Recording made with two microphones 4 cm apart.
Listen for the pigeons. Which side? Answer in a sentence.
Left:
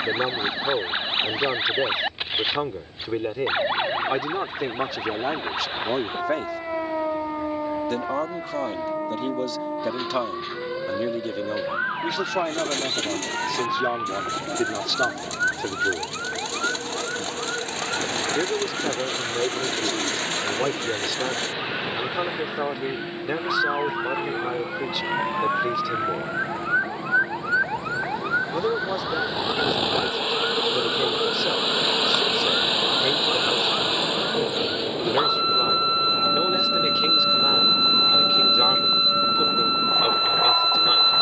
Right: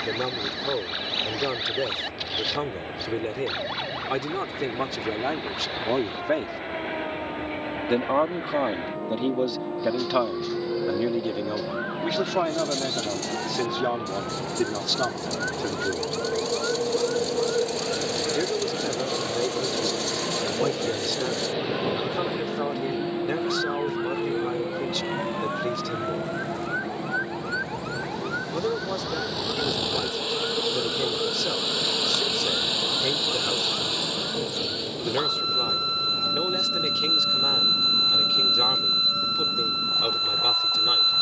In this clip you hear the pigeons on the left.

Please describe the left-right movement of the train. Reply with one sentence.
You can hear the train travel towards the left.